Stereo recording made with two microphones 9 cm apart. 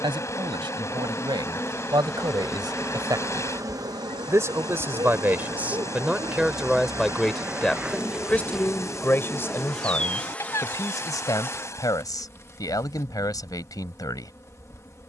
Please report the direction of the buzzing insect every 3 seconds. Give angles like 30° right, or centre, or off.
20° left, 40° right, 20° right, 10° left, 30° left.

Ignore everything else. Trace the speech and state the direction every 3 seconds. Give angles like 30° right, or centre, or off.
50° right, 30° right, centre, 30° left, 40° left.